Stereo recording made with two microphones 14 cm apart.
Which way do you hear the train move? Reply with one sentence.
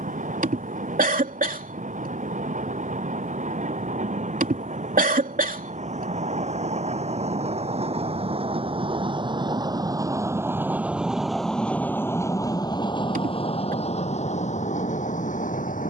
In this clip you hear the train move from right to left.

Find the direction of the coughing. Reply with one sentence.
You can hear the coughing on the right.